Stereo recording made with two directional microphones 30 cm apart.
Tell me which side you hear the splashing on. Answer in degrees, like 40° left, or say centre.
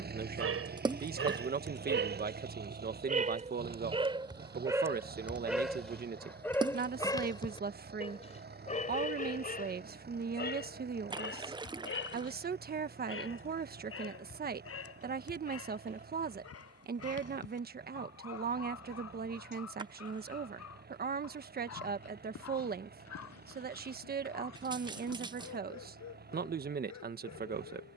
10° right.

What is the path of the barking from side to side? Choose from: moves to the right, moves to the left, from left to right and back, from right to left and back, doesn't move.
moves to the left.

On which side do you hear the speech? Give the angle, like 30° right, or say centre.
30° right.